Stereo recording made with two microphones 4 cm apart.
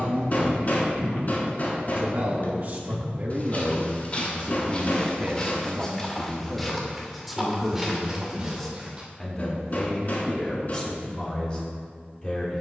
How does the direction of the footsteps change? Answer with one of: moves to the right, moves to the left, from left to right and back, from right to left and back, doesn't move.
moves to the right.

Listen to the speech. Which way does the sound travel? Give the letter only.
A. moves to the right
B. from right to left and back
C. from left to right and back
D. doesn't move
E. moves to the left
E.